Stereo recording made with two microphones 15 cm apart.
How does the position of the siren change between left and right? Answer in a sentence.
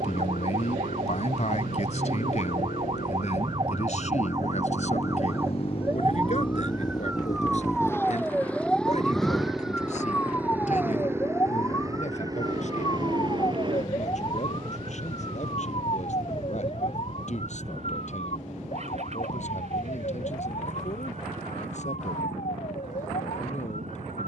In this clip you hear the siren travel towards the left.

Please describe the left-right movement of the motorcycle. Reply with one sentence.
In this clip you hear the motorcycle go from the left side to the right.